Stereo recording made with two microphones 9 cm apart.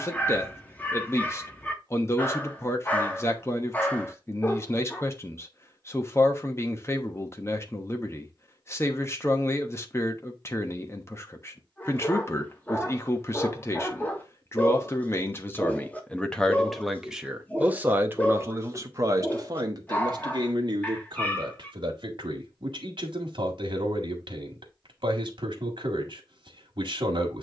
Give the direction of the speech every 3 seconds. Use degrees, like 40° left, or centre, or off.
30° left, 30° left, 30° left, 30° left, 30° left, 10° left, 40° right, 60° right, 60° right.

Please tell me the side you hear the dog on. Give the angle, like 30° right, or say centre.
20° left.